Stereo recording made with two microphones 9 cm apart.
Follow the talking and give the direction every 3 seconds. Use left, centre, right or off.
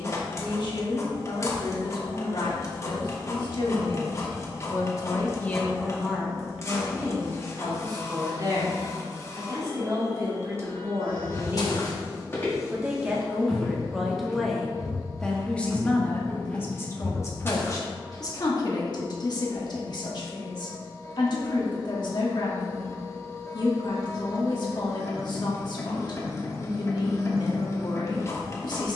left, left, right, right, centre, left, left, left, left, left.